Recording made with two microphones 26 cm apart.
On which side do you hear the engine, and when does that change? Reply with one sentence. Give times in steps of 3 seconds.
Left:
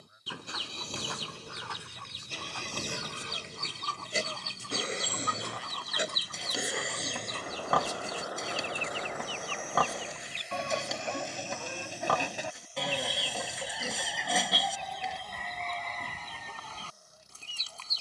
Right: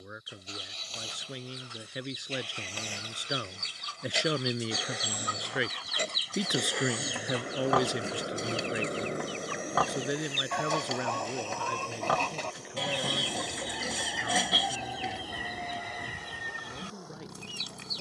In this clip you hear the engine on the left from 0 s, in the centre from 6 s and on the right from 9 s.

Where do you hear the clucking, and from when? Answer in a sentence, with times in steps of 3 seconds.
You can hear the clucking on the left from 0 s and in the centre from 12 s.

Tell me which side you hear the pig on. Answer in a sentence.
In this clip you hear the pig in the centre.